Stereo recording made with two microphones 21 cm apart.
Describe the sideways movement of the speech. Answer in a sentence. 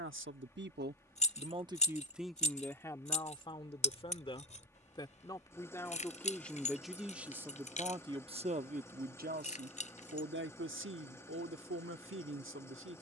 You can hear the speech go left and come back.